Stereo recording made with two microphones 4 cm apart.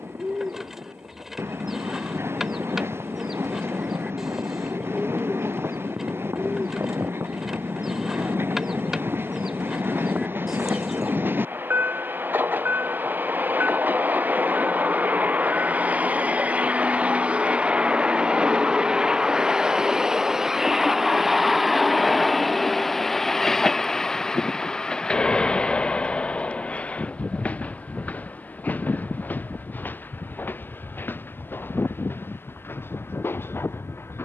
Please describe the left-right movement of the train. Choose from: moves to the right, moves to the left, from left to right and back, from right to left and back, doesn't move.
moves to the left.